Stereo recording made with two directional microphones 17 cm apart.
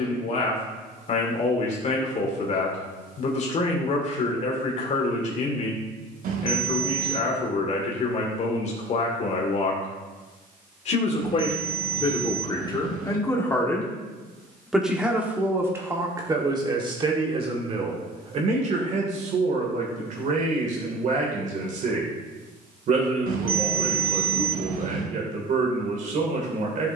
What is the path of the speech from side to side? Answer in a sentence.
You can hear the speech move from left to right.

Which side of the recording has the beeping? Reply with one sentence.
You can hear the beeping on the right.